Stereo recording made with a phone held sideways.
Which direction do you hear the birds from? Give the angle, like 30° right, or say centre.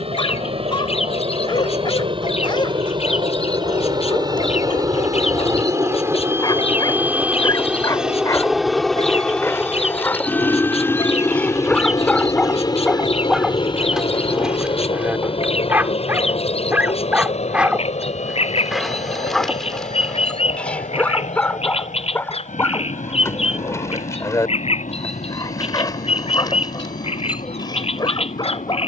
50° left.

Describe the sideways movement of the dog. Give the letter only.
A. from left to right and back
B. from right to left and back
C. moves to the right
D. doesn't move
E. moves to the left
A.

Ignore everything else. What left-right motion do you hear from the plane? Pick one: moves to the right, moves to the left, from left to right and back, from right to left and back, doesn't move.
moves to the left.